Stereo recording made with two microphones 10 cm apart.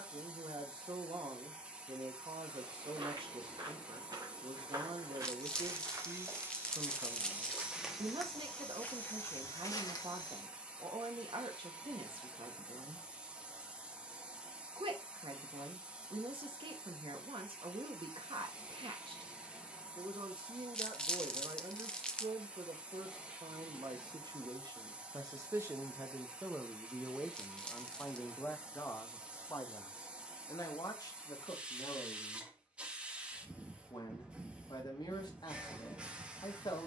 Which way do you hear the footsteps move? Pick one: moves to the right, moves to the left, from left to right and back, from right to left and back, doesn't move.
moves to the left.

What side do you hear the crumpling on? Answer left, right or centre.
centre.